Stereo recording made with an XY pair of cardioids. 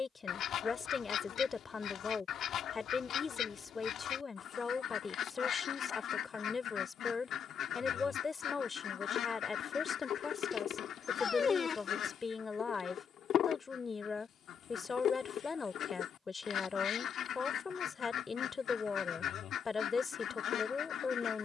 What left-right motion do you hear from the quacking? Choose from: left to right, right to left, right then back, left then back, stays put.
stays put.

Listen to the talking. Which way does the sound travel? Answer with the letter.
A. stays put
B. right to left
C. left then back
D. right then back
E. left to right
A.